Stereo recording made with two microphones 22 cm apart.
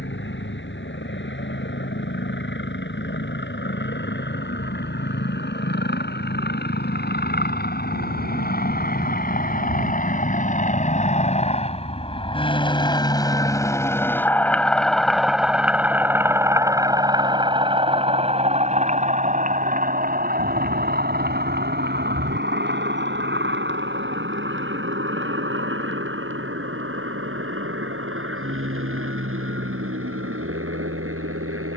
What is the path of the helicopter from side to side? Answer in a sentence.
In this clip you hear the helicopter move from left to right.